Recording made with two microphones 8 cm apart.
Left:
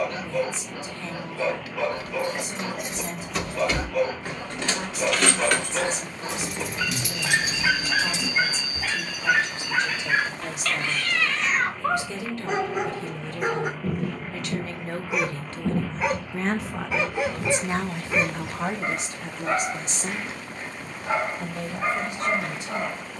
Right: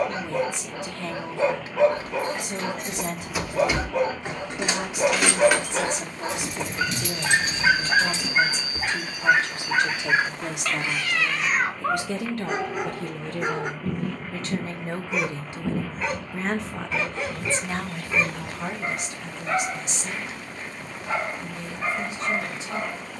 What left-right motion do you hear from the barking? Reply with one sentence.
You can hear the barking go from the right side to the left.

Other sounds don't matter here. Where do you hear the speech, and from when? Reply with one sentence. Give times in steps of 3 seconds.
In this clip you hear the speech on the right from 0 s, in the centre from 15 s and on the left from 18 s.